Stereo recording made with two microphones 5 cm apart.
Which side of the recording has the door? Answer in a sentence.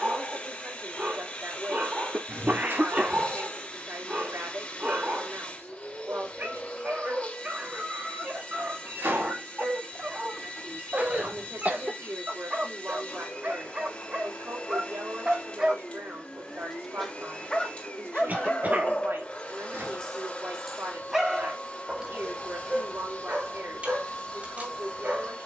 You can hear the door on the right.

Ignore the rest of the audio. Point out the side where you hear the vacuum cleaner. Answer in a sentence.
You can hear the vacuum cleaner on the left.